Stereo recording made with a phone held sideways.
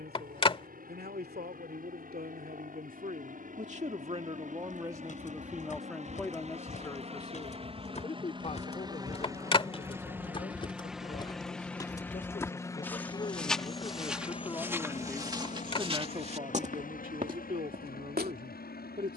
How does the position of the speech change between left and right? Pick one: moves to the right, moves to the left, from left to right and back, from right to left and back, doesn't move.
from right to left and back.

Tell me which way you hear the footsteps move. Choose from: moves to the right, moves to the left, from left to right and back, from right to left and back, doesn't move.
moves to the right.